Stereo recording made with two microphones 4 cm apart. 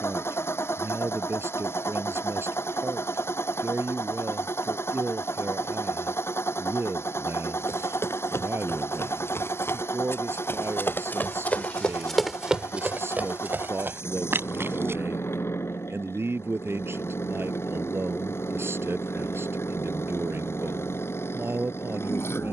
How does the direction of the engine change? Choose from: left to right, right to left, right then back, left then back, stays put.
stays put.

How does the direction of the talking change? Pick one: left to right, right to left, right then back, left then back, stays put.
stays put.